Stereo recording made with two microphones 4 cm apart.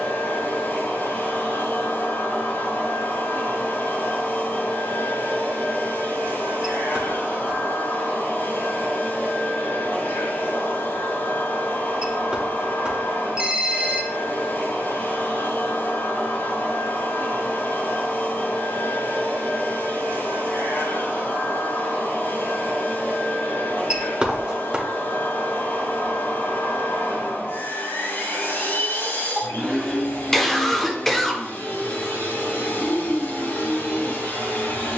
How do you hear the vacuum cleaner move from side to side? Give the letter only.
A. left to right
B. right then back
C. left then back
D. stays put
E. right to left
D.